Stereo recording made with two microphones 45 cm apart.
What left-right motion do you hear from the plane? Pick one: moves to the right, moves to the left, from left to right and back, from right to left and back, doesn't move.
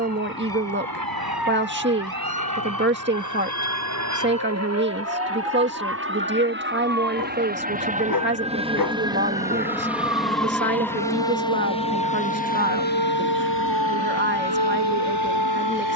moves to the left.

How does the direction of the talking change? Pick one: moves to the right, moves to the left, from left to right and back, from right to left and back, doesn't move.
doesn't move.